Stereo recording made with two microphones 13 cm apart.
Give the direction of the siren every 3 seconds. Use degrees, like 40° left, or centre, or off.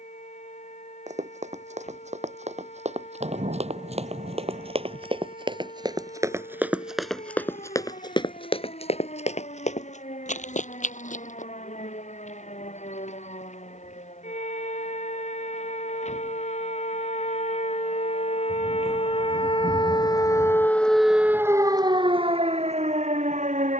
80° left, 80° left, 80° left, 80° left, 70° left, 70° left, 40° left, 40° right.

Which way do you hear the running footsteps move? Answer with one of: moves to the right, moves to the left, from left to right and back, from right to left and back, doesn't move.
moves to the left.